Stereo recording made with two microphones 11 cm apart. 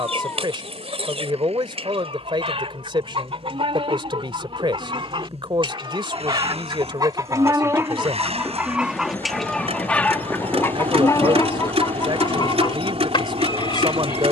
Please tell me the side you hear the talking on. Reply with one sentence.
You can hear the talking on the right.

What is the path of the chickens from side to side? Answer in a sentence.
You can hear the chickens move from right to left.